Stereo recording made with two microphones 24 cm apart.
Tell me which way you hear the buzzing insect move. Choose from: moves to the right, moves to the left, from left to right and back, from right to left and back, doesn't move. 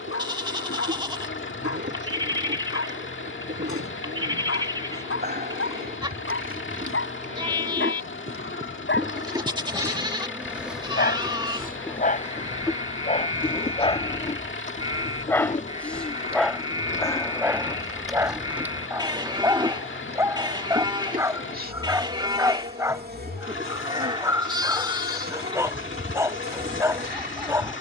from right to left and back.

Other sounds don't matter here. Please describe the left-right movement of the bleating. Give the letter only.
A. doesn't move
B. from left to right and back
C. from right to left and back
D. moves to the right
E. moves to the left
A.